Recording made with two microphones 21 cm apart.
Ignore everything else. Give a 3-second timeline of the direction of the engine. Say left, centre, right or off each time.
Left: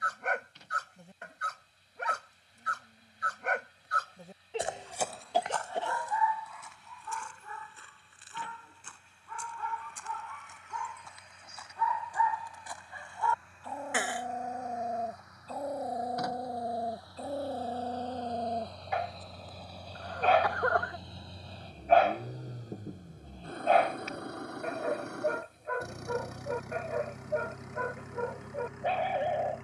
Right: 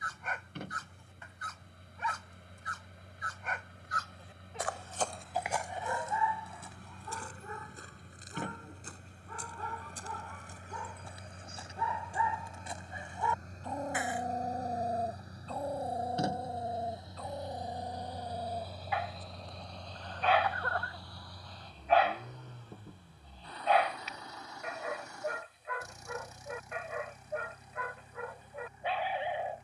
right, right, right, right, right, right, centre, left, left, left.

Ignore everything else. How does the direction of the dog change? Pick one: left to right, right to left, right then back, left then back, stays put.
right then back.